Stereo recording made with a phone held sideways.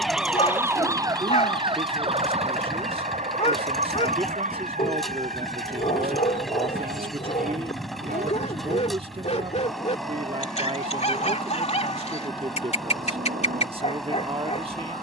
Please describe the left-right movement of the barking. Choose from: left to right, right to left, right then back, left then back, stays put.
stays put.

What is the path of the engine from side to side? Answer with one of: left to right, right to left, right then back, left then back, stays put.
stays put.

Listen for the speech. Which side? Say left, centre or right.
right.